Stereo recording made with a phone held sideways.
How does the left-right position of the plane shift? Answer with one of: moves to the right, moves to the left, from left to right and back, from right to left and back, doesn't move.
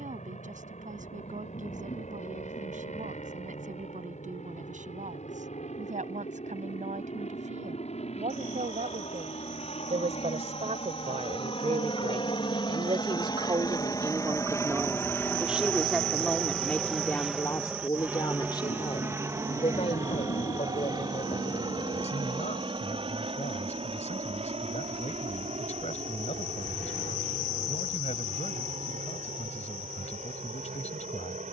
moves to the right.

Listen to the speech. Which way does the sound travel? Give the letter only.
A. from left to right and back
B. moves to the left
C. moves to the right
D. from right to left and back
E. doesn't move
B.